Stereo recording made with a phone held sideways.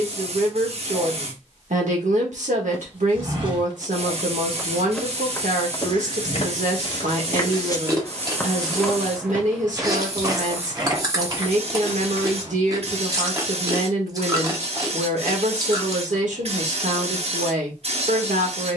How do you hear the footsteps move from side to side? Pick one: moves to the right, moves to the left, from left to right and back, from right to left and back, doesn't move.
from right to left and back.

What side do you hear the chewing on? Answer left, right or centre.
right.